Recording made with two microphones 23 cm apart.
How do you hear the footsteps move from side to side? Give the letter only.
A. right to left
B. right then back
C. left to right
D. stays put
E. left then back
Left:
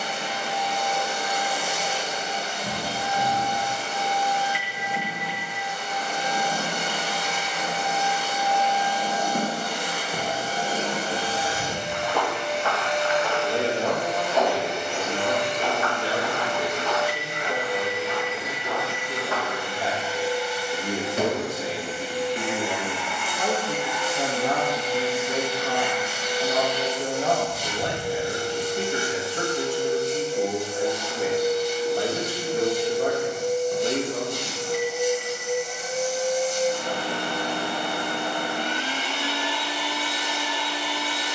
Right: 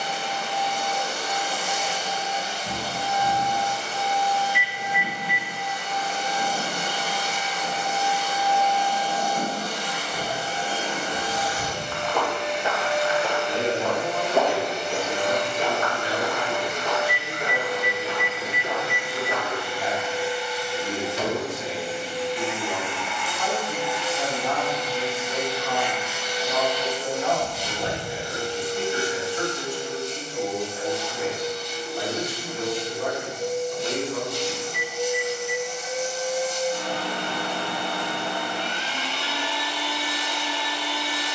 B.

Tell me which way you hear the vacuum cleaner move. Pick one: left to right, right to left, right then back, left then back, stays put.
right then back.